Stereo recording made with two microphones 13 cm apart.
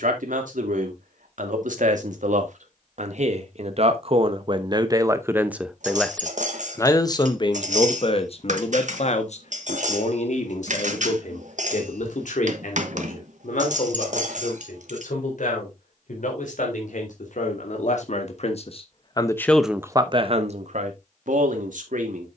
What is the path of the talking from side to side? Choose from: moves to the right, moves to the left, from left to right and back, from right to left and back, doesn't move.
from right to left and back.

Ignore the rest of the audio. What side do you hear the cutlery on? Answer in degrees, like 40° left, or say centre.
60° right.